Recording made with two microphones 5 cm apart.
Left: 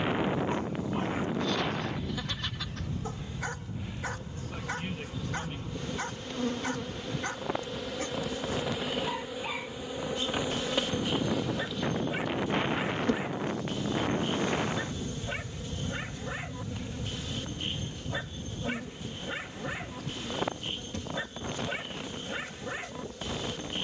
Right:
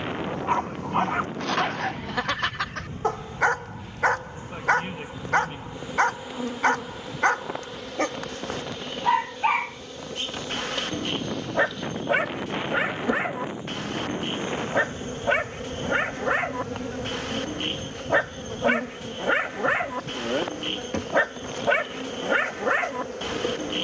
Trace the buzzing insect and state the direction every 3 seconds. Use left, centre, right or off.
right, right, centre, centre, right, right, right, right.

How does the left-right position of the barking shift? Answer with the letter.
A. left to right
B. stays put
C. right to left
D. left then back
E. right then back
B.